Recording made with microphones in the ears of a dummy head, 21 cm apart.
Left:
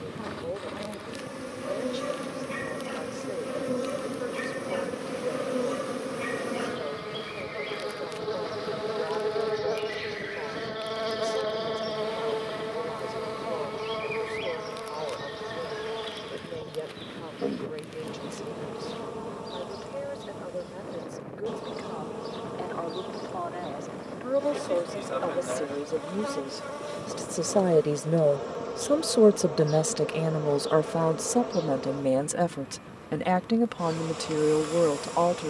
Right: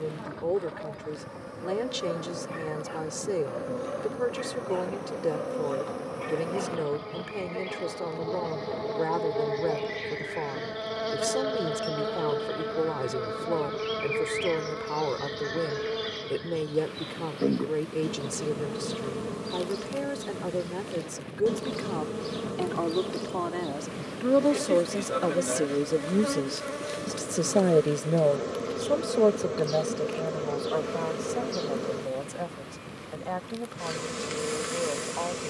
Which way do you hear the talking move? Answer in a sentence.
You can hear the talking go from the right side to the left.